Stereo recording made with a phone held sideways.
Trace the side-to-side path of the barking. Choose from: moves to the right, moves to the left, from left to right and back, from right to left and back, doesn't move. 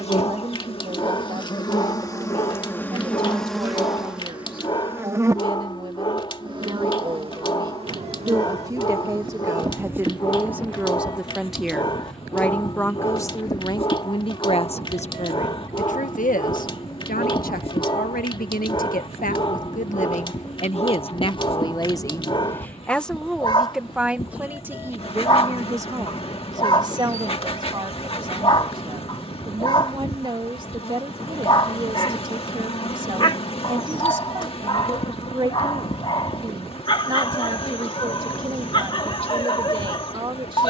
doesn't move.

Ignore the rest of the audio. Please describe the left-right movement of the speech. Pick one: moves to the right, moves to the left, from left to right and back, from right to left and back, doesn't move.
from right to left and back.